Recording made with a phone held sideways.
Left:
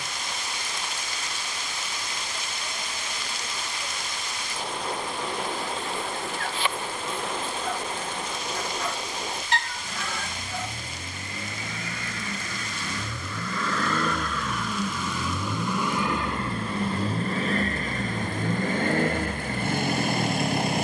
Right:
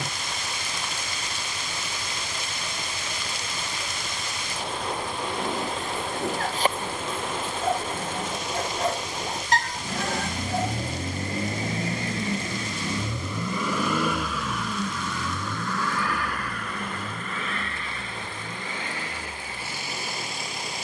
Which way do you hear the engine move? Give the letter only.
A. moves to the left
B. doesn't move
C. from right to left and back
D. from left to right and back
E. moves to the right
A.